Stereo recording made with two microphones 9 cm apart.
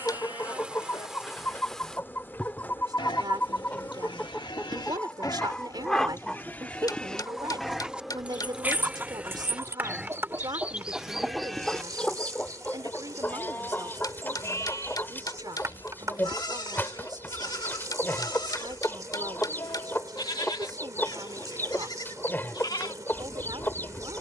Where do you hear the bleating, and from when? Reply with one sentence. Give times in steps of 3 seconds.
You can hear the bleating on the left from 0 s, in the centre from 6 s and on the left from 12 s.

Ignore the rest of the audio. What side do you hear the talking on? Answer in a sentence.
You can hear the talking on the right.